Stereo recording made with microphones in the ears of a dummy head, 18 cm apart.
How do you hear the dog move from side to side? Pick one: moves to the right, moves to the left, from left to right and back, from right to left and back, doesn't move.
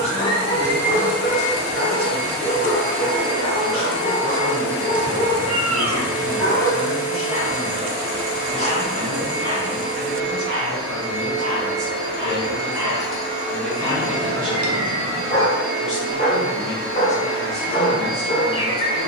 from left to right and back.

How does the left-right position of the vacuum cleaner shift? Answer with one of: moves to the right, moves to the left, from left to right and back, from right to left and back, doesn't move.
doesn't move.